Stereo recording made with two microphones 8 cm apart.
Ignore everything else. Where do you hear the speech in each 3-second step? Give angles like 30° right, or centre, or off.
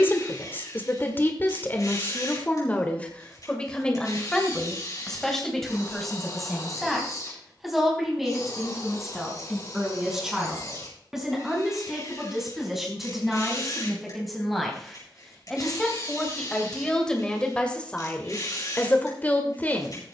30° left, 10° left, centre, 10° right, centre, 10° left, 20° left.